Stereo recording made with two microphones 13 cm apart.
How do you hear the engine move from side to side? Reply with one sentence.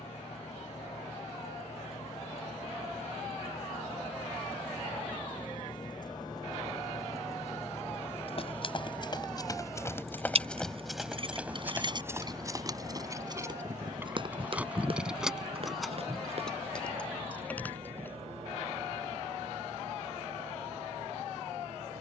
In this clip you hear the engine go from the left side to the right.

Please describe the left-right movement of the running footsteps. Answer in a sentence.
You can hear the running footsteps go from the left side to the right.